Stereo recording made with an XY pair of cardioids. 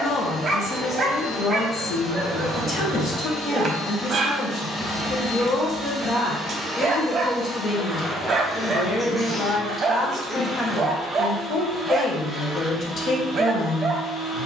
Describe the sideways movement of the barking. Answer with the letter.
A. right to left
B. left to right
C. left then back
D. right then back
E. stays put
E.